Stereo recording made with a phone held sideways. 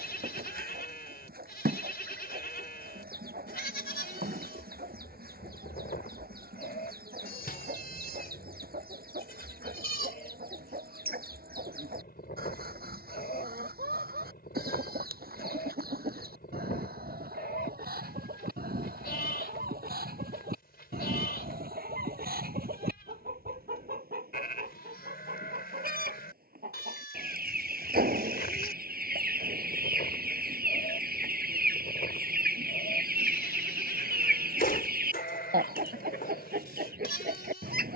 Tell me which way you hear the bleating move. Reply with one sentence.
In this clip you hear the bleating stay in one place.